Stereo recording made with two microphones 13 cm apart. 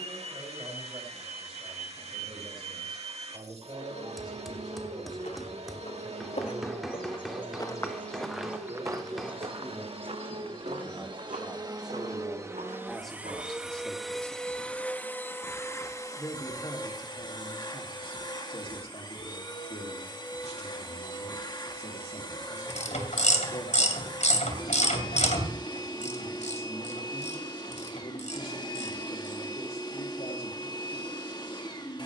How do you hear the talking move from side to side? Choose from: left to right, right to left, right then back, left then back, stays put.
right to left.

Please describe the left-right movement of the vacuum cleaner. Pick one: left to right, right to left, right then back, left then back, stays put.
right to left.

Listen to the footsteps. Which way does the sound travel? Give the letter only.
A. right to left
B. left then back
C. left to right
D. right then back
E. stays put
C.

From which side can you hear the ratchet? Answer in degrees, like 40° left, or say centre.
70° left.